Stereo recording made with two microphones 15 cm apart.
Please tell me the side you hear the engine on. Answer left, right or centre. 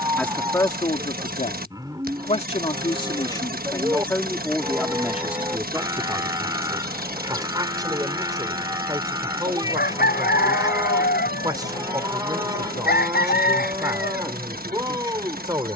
right.